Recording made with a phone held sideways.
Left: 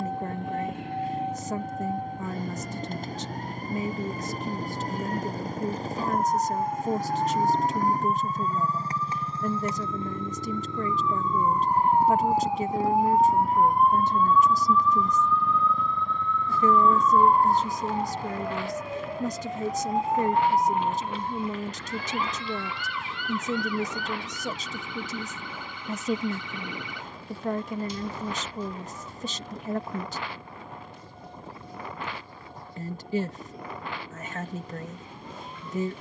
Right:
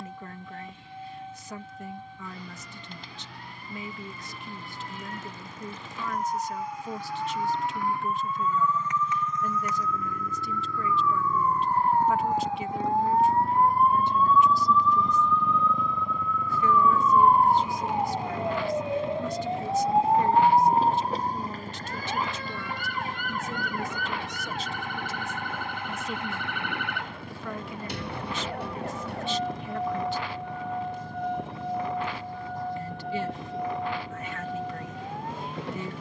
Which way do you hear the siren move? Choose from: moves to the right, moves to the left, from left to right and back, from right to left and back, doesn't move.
moves to the right.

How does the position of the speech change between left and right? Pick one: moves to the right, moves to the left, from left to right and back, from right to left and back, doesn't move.
doesn't move.